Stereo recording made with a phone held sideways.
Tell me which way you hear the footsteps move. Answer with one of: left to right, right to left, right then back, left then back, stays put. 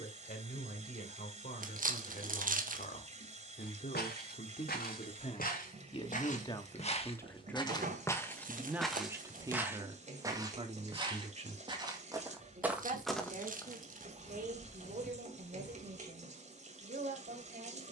right then back.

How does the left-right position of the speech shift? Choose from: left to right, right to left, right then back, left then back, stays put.
left to right.